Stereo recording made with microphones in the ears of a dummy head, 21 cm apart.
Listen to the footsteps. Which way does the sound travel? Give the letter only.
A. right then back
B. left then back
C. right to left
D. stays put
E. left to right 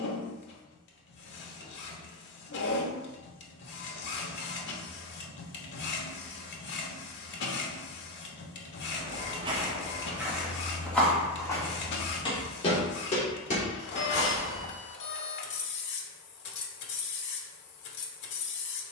C.